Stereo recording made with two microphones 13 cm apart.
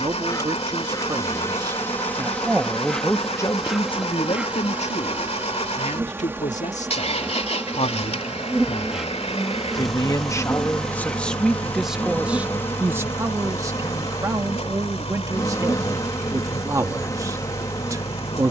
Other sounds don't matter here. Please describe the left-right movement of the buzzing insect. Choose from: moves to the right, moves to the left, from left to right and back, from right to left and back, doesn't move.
from left to right and back.